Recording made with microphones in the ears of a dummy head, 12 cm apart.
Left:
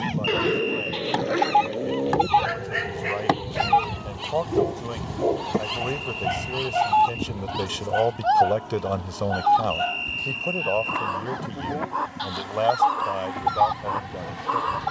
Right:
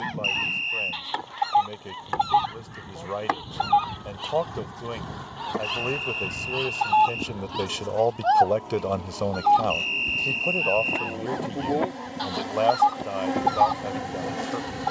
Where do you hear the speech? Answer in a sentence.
In this clip you hear the speech in the centre.